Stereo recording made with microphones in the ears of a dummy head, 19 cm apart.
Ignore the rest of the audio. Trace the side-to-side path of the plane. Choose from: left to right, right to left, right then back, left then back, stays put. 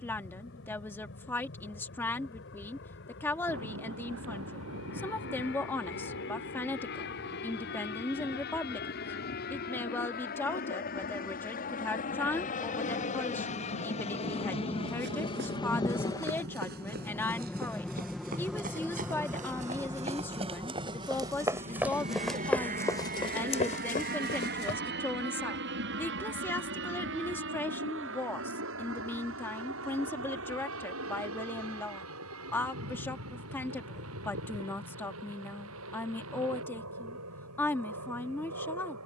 left to right.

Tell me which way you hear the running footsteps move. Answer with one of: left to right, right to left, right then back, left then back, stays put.
right to left.